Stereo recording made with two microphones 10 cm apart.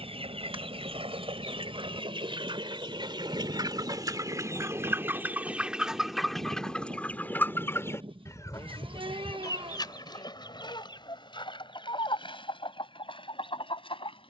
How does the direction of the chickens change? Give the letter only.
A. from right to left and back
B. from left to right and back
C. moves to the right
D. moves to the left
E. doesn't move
D.